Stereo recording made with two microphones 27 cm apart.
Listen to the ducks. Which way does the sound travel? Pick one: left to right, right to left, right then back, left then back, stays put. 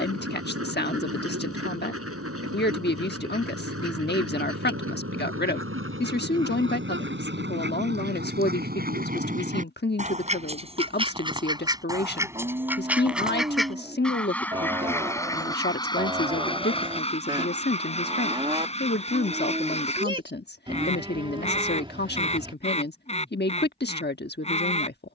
right to left.